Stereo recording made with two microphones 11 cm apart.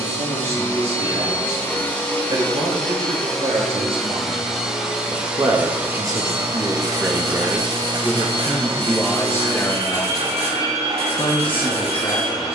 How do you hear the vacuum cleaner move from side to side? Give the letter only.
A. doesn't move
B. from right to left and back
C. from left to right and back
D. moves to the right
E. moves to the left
D.